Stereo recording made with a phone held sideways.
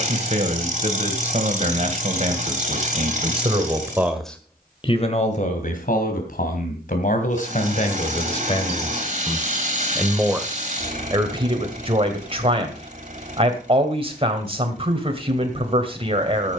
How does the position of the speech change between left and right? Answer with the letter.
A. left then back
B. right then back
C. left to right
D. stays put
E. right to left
A.